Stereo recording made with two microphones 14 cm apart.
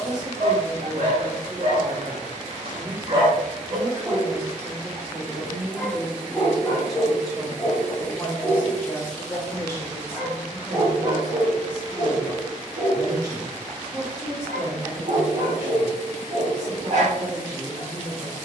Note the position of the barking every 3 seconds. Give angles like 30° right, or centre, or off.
50° right, 20° right, 30° left, 30° right, 50° right, 60° right.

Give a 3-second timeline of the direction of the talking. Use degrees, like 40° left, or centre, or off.
30° right, 20° right, centre, 10° left, 20° right, 20° right.